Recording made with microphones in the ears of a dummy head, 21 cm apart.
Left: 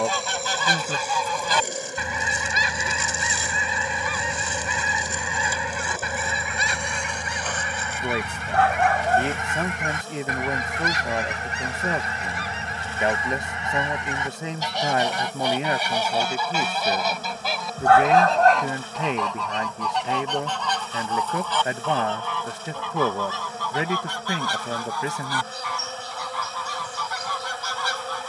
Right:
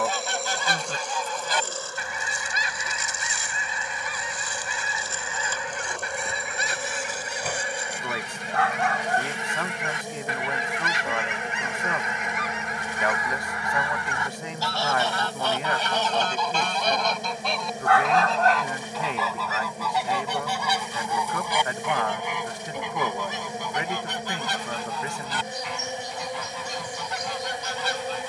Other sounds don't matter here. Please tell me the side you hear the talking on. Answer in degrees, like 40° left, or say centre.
20° left.